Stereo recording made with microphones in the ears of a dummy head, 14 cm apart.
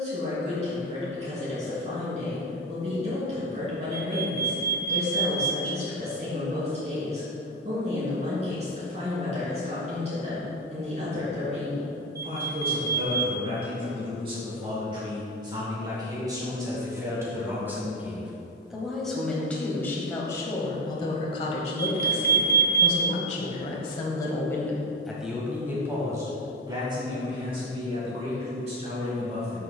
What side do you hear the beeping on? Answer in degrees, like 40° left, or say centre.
20° right.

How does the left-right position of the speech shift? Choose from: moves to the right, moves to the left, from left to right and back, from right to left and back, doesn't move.
from right to left and back.